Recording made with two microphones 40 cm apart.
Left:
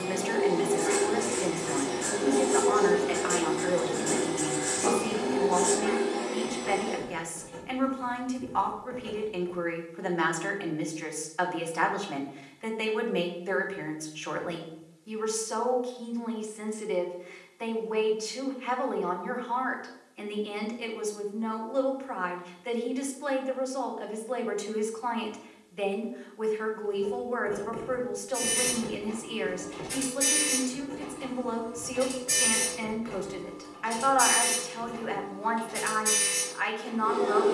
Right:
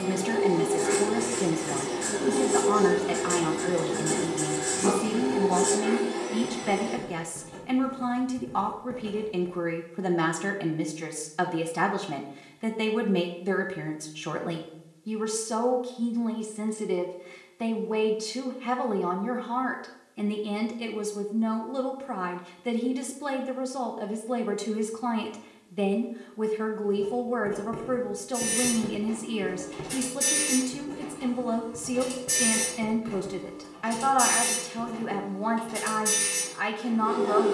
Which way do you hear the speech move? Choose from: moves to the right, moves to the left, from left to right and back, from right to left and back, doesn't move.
doesn't move.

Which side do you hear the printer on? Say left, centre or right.
right.